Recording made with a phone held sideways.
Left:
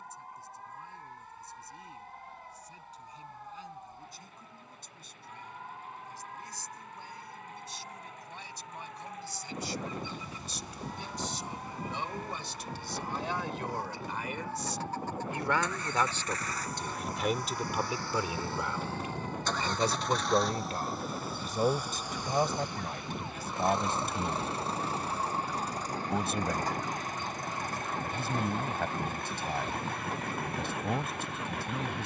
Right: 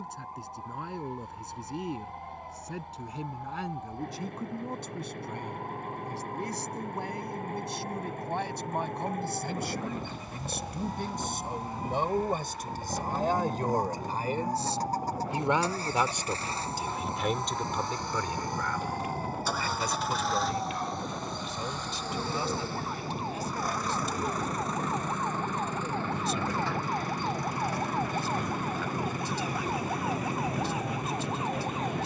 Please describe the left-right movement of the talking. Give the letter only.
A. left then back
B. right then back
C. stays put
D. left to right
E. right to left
E.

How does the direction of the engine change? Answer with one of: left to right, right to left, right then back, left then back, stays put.
right to left.